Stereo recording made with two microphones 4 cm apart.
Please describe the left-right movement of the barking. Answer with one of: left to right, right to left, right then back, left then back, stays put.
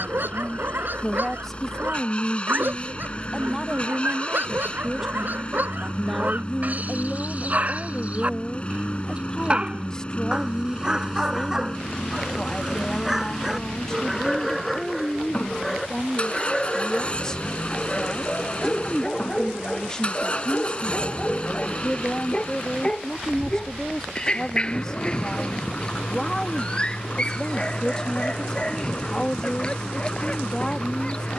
right to left.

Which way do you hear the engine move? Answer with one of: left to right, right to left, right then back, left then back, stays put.
stays put.